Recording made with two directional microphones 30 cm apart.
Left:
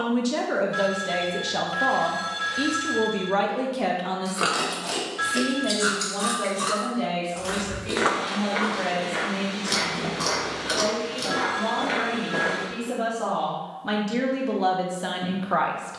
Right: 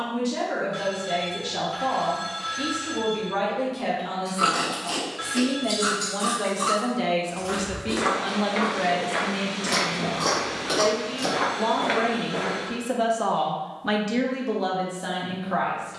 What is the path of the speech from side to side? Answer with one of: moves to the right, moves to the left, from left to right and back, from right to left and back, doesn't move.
from left to right and back.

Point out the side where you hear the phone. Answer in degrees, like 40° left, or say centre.
20° left.